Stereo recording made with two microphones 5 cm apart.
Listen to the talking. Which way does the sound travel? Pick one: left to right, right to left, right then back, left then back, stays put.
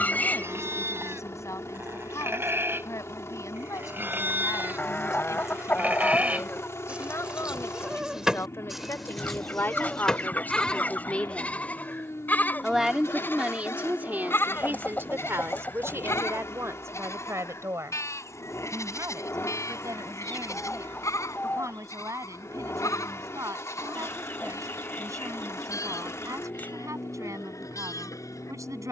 left to right.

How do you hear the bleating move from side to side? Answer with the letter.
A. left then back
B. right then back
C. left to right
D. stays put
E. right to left
E.